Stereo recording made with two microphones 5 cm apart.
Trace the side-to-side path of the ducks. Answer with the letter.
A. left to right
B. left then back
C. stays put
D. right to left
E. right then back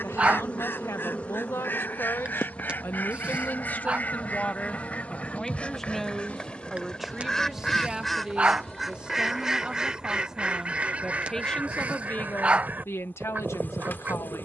A.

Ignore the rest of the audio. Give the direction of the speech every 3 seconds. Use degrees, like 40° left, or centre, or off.
70° left, 30° left, 10° right, centre, 60° left.